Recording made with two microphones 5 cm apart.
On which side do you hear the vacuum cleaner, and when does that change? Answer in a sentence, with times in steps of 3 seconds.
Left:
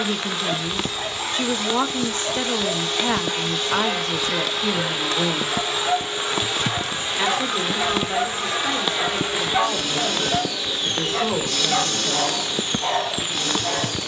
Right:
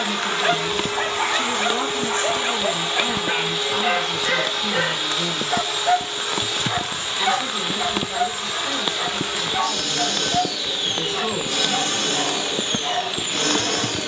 You can hear the vacuum cleaner on the right from 0 s, in the centre from 3 s, on the left from 6 s, in the centre from 9 s and on the right from 12 s.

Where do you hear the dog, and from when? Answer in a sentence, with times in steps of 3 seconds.
In this clip you hear the dog on the right from 0 s, in the centre from 6 s and on the left from 9 s.